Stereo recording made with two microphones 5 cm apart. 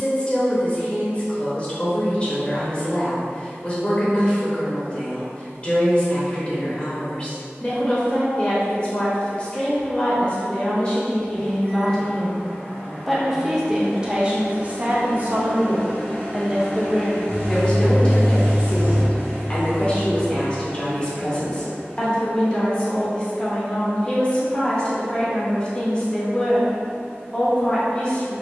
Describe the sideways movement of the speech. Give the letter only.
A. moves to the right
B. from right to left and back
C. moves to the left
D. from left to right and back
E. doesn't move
D.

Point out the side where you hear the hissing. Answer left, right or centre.
right.